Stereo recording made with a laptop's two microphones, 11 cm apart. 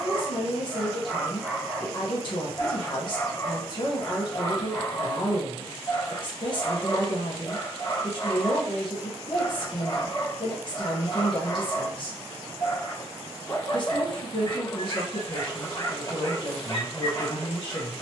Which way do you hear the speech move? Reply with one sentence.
In this clip you hear the speech stay in one place.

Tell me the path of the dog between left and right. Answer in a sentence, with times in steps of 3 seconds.
You can hear the dog in the centre from 0 s and on the left from 3 s.